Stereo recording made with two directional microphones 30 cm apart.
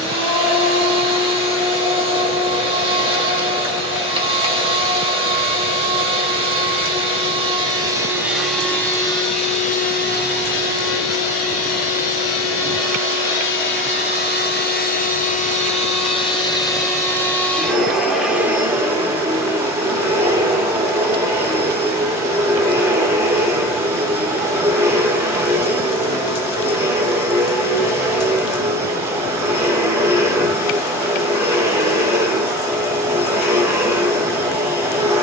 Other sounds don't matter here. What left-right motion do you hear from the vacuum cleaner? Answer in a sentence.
In this clip you hear the vacuum cleaner move from right to left and back again.